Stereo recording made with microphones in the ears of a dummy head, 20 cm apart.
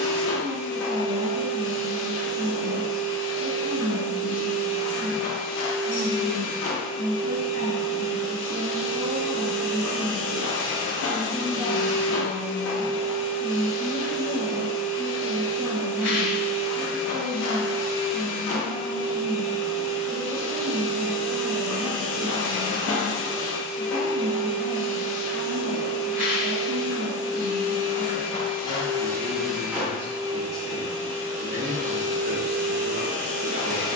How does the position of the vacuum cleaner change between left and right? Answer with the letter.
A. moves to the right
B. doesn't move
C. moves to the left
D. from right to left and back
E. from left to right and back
A.